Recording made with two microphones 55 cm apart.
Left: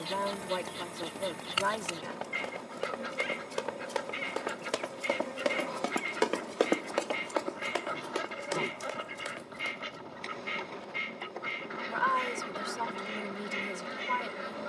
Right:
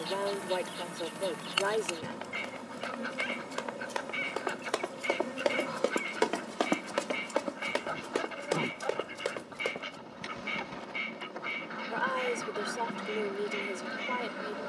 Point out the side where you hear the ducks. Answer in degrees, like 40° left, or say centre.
40° left.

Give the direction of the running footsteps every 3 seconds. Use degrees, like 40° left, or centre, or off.
70° left, 50° left, 50° right, 80° right, off.